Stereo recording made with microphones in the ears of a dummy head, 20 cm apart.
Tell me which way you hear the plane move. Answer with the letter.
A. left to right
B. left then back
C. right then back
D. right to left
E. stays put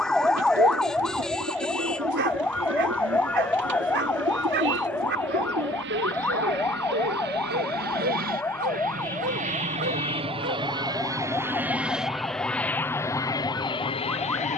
D.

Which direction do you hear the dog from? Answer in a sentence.
You can hear the dog on the right.